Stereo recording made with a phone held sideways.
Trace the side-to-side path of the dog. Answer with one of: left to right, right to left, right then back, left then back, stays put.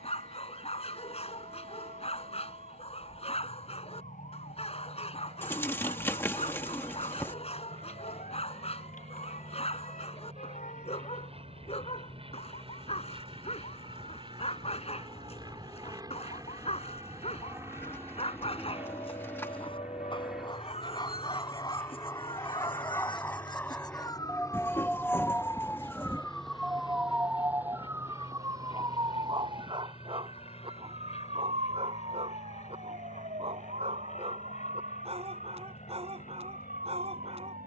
left to right.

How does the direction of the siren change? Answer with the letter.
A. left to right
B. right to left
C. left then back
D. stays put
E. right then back
A.